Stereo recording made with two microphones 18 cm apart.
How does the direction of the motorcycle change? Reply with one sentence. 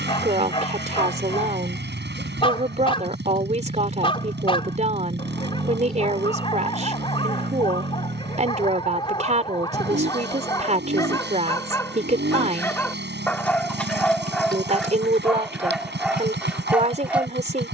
You can hear the motorcycle stay in one place.